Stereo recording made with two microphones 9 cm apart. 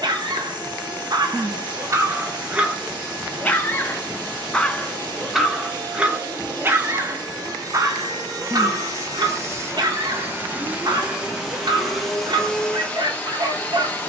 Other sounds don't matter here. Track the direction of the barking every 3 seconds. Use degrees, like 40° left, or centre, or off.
40° right, 10° left, 40° right, 60° right, 60° right.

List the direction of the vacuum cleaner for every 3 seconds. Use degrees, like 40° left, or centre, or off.
50° right, 50° right, 50° right, 20° right, 10° left.